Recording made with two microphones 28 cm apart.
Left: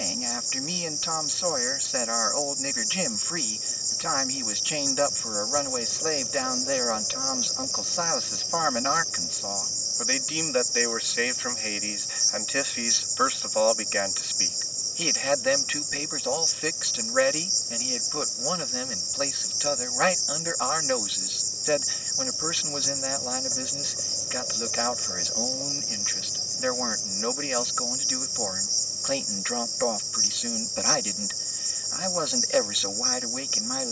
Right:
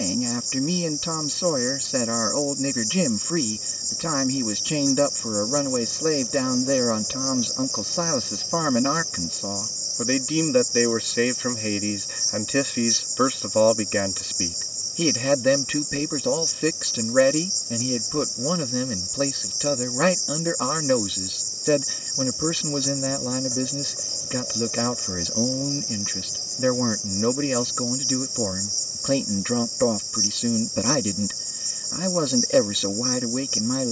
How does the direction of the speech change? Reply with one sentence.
In this clip you hear the speech stay in one place.